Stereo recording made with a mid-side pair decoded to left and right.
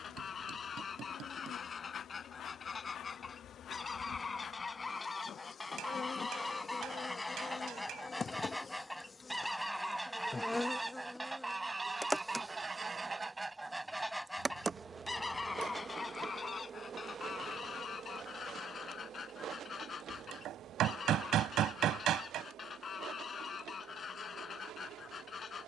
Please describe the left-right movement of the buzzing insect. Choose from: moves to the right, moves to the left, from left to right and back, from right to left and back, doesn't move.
moves to the right.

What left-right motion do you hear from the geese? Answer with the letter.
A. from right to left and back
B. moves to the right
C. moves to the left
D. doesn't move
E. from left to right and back
E.